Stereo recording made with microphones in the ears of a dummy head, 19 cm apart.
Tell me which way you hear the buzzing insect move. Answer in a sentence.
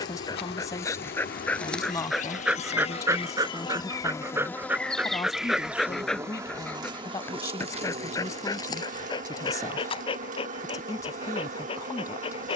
In this clip you hear the buzzing insect move to the right.